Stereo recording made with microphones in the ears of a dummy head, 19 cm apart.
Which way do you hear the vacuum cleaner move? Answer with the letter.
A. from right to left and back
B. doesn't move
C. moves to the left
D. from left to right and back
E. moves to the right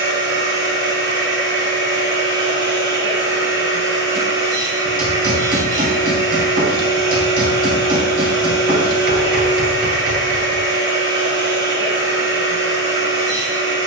B.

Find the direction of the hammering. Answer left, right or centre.
right.